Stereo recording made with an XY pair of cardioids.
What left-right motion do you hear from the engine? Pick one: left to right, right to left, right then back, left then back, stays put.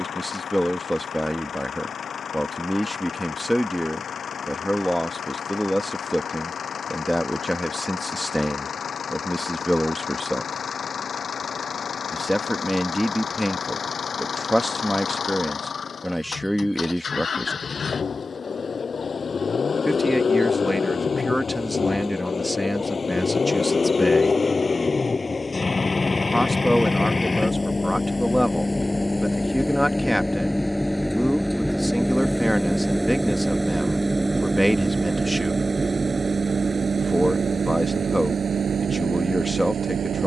left to right.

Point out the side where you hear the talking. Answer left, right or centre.
centre.